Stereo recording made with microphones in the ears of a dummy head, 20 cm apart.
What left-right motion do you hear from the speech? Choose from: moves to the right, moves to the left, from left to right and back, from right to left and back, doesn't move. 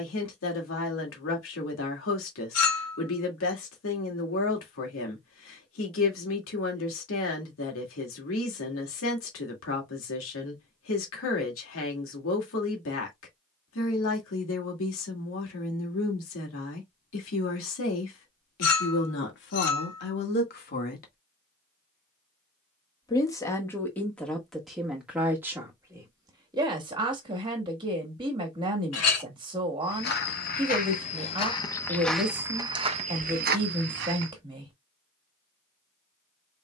moves to the right.